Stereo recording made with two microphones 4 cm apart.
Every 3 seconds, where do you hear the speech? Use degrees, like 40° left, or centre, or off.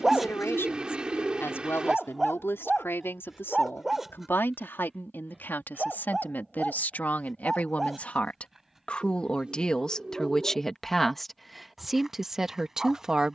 60° left, 50° left, 40° left, 10° left, 10° right.